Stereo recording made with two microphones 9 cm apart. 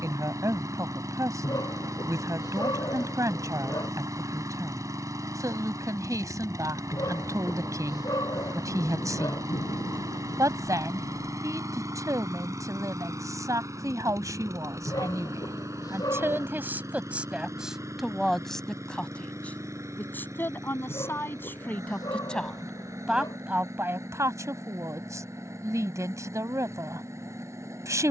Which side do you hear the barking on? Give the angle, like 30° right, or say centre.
40° left.